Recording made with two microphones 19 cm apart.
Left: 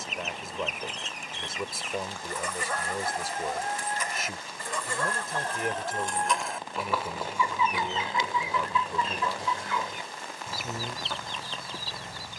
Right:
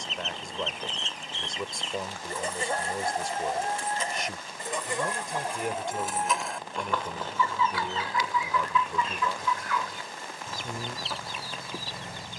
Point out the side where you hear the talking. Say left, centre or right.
centre.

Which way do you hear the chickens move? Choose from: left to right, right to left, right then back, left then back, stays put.
left then back.